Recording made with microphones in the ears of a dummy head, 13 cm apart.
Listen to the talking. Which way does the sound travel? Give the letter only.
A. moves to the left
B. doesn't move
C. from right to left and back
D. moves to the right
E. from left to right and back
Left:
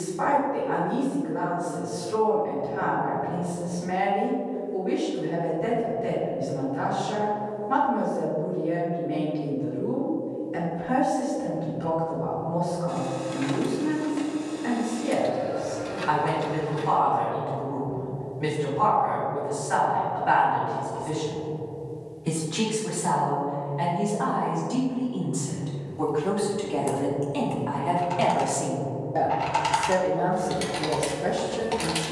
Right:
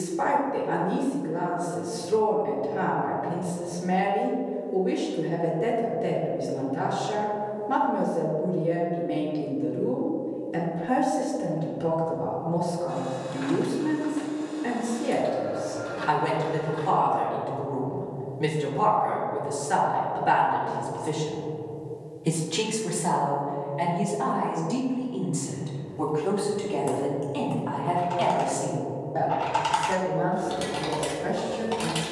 A.